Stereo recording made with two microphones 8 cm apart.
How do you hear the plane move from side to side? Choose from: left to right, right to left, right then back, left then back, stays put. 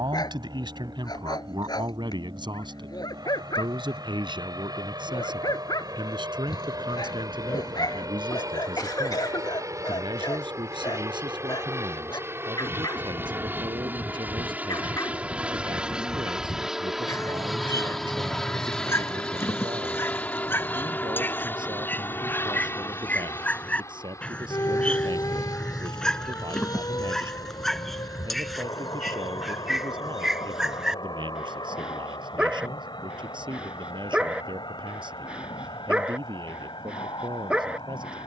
right to left.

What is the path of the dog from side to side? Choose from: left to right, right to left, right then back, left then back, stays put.
left to right.